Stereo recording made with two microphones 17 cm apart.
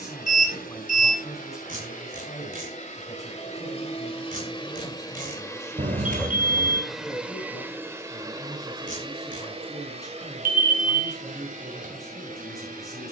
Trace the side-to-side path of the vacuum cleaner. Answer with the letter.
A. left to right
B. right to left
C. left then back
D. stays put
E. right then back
A.